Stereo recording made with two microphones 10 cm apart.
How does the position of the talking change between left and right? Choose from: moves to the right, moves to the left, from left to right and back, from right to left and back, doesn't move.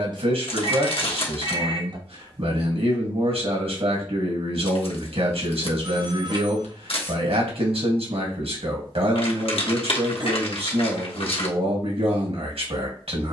doesn't move.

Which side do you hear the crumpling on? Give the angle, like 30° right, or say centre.
70° left.